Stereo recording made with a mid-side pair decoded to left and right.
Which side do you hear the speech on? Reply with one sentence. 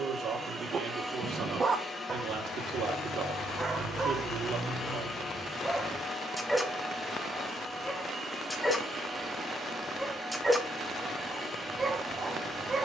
You can hear the speech on the right.